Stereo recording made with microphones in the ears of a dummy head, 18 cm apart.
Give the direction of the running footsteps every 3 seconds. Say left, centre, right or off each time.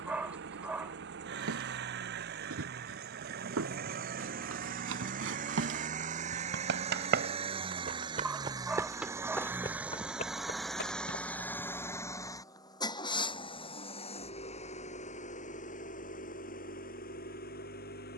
right, right, right, left, off, off.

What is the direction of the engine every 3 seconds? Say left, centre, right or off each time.
right, right, right, centre, left, left.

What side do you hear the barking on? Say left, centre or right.
centre.